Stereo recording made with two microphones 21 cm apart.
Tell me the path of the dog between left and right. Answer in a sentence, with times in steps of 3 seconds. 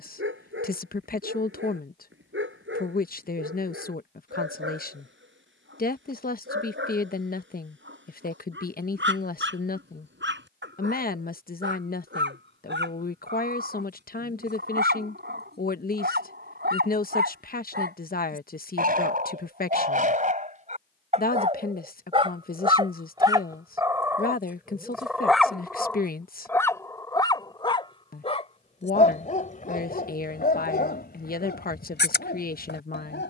You can hear the dog on the right from 0 s, in the centre from 24 s and on the left from 27 s.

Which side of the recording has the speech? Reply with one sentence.
In this clip you hear the speech on the left.